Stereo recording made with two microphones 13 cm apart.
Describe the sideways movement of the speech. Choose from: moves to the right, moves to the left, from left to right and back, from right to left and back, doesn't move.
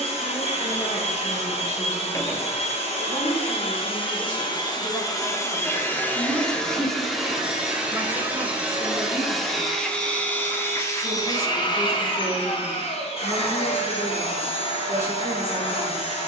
moves to the right.